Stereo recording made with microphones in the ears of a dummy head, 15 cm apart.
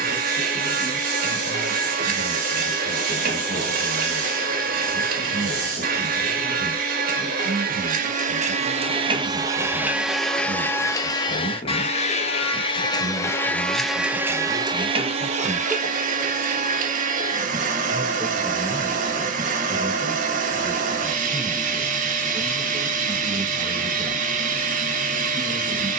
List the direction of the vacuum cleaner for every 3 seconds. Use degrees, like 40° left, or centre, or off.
60° right, 60° right, 50° right, 10° left, 10° left, 50° right, 50° right, 50° right, 50° right.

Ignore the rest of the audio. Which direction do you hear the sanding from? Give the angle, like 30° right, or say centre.
50° right.